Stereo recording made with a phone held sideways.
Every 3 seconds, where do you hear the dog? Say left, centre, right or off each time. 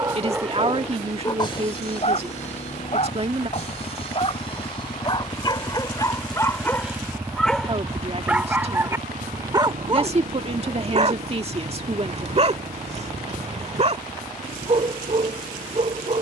left, left, centre, right, right, right.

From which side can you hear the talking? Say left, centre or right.
right.